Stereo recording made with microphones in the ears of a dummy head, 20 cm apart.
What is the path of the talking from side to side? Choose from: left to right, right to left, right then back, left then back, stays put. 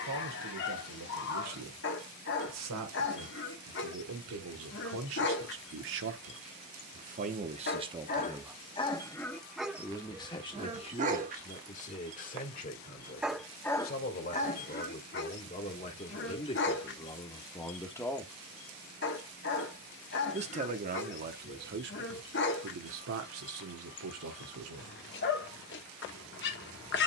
left then back.